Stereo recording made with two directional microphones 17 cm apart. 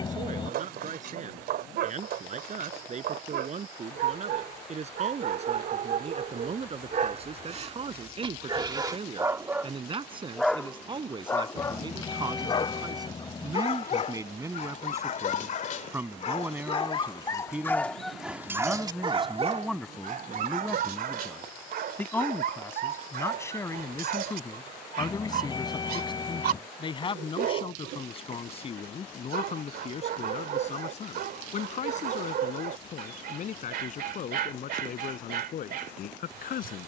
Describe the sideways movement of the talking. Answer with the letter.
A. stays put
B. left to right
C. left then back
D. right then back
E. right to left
E.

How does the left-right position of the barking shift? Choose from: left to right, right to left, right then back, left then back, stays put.
left then back.